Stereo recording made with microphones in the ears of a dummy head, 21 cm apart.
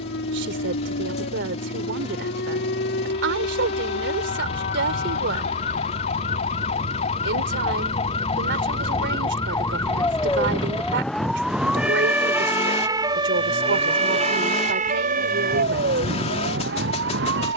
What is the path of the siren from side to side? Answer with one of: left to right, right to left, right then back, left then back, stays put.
left to right.